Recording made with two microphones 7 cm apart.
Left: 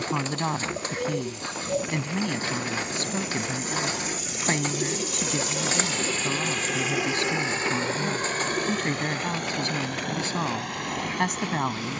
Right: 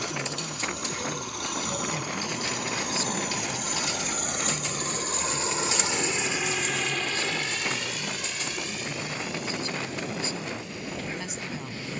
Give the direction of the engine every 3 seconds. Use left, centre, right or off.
right, right, left, left.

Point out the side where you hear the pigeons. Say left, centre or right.
left.